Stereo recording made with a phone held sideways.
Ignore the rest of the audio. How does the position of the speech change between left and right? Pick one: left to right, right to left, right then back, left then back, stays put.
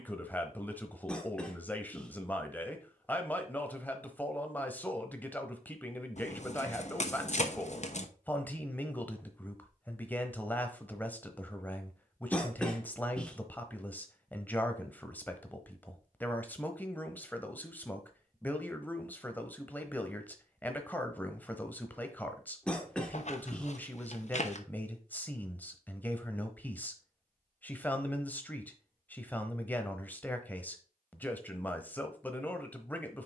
stays put.